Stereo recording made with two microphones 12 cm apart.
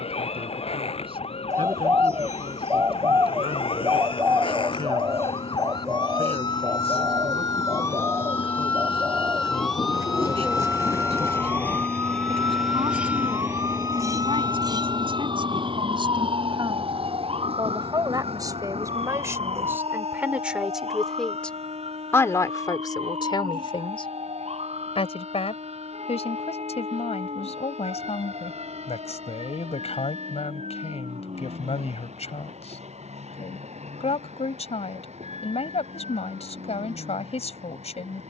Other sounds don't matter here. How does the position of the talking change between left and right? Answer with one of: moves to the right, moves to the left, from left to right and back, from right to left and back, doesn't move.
moves to the left.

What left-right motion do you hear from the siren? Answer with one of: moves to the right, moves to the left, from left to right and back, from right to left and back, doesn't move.
moves to the right.